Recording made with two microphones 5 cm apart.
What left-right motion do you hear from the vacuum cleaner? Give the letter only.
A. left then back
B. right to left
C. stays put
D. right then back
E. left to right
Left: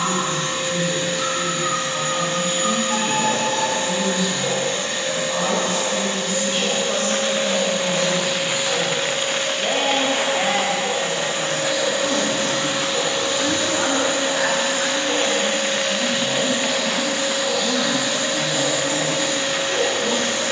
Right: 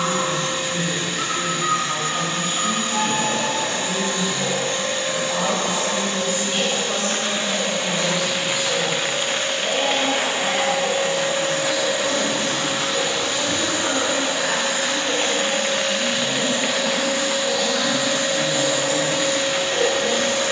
C.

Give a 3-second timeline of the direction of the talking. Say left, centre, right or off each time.
right, right, centre, left, left, centre, right.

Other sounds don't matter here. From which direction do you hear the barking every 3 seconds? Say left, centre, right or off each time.
right, right, right, centre, centre, right, right.